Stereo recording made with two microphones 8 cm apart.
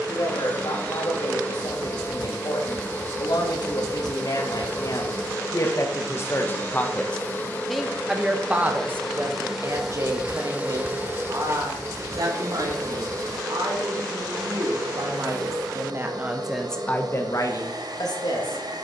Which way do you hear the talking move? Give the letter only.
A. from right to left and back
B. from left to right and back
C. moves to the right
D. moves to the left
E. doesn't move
B.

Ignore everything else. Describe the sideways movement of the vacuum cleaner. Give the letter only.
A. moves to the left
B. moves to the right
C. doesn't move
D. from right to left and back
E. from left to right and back
B.